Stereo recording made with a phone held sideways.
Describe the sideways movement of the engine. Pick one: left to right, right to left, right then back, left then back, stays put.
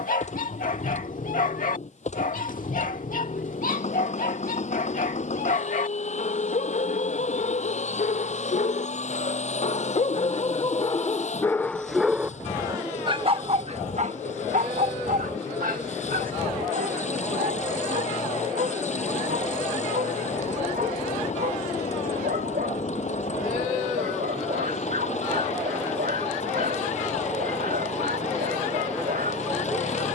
stays put.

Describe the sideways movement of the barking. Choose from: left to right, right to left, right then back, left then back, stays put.
left to right.